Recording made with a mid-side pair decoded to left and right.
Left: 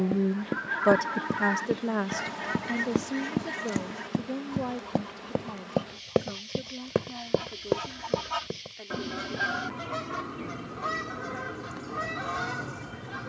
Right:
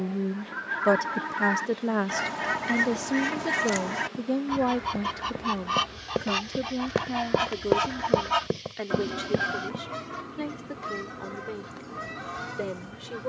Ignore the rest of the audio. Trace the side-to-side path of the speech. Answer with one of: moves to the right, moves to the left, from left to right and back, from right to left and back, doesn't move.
moves to the right.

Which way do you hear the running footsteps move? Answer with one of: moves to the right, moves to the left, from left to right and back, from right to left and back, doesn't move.
moves to the right.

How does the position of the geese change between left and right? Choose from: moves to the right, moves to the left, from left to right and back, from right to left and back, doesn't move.
from left to right and back.